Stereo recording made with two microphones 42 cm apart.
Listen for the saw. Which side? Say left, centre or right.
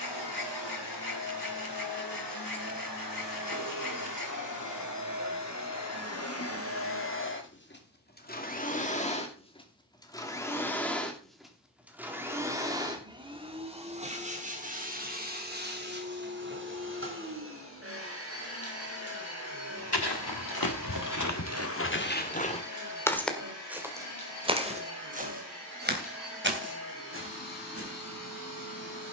left.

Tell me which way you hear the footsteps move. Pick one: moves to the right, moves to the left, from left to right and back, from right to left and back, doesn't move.
moves to the right.